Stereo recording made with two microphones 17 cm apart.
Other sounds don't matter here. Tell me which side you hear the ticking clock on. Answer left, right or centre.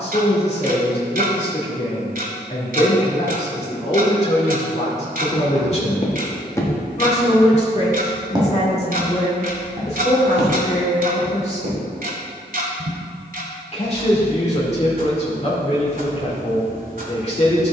right.